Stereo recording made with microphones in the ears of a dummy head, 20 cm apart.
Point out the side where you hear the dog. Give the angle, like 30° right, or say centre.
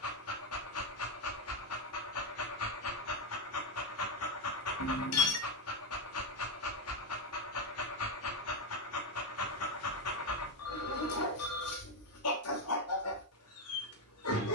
70° left.